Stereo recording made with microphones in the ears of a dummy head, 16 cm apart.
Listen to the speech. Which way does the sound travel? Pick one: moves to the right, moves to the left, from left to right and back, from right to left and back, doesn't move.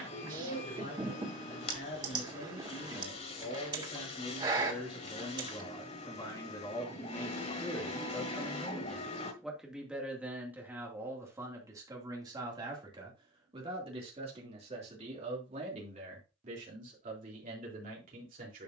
moves to the right.